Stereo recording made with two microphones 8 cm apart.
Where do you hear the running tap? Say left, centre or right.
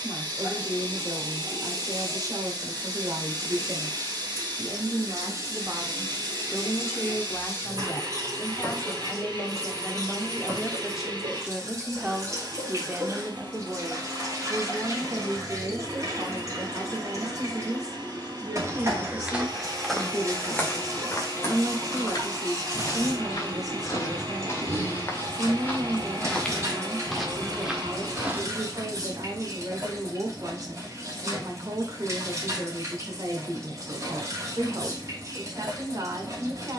right.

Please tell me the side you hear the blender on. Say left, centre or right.
right.